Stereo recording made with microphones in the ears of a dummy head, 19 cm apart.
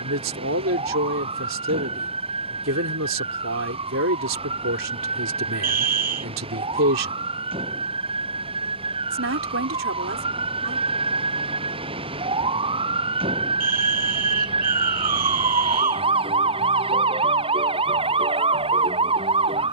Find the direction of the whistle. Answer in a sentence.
In this clip you hear the whistle on the right.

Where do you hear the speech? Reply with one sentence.
You can hear the speech on the right.